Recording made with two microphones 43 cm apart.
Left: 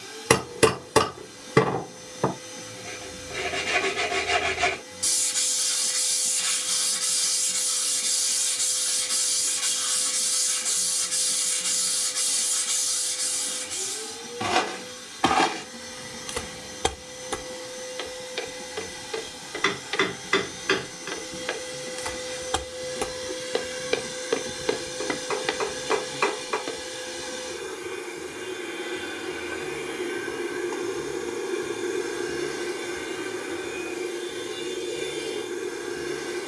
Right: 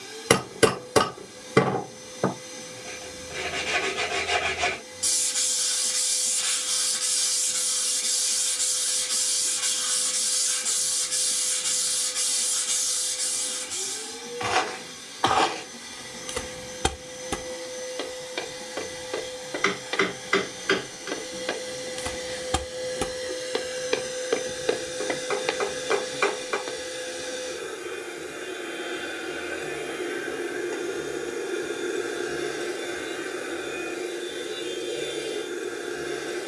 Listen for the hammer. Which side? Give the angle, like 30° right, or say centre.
centre.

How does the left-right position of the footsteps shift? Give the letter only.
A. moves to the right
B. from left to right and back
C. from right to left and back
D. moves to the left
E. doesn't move
B.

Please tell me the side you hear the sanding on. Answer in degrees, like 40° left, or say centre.
40° left.